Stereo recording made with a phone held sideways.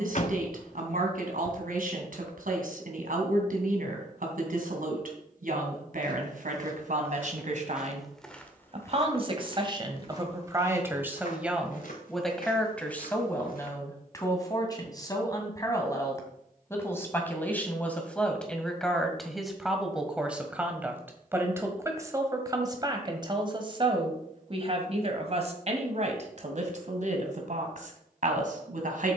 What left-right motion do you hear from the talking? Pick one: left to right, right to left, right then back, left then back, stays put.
left then back.